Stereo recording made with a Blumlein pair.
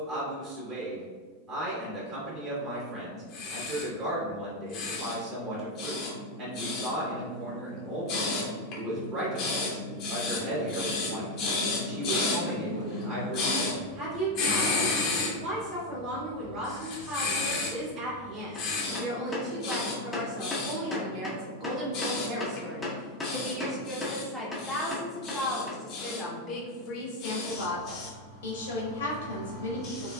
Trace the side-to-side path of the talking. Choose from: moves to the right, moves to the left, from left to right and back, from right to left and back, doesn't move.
moves to the left.